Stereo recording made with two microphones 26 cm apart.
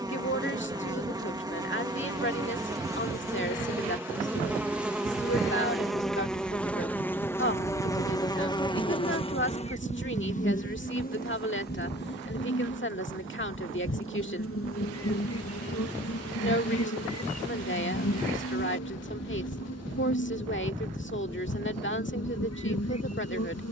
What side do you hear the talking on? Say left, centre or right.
left.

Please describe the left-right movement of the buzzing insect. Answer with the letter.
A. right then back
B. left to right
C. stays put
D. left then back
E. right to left
E.